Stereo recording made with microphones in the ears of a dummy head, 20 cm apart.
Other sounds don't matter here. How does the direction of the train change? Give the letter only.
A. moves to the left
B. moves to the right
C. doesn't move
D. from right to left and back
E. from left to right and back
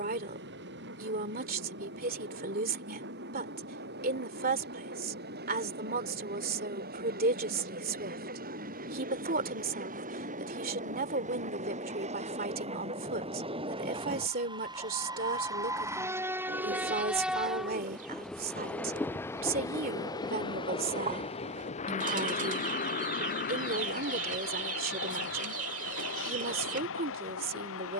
A.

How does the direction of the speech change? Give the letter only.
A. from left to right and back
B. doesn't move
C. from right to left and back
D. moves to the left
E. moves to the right
B.